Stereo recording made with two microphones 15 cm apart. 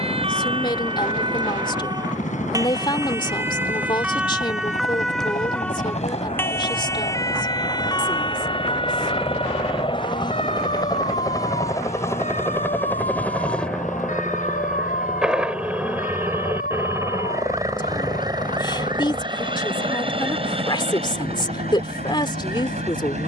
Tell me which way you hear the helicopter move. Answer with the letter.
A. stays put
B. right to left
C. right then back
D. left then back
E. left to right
E.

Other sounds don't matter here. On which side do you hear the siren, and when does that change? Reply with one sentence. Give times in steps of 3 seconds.
You can hear the siren on the right from 0 s, in the centre from 3 s and on the left from 6 s.